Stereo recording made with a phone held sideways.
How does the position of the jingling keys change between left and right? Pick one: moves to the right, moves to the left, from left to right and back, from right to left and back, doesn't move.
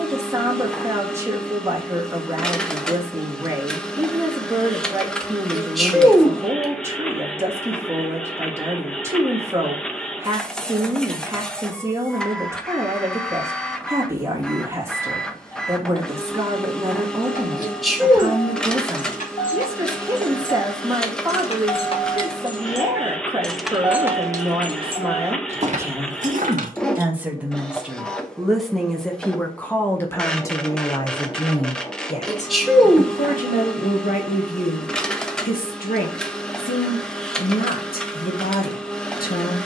moves to the right.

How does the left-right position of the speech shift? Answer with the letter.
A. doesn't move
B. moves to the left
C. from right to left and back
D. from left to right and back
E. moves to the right
B.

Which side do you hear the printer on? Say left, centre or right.
centre.